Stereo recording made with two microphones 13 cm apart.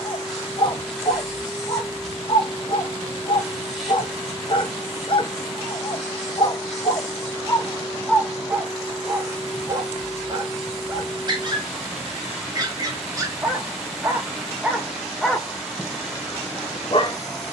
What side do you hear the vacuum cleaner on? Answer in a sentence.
You can hear the vacuum cleaner in the centre.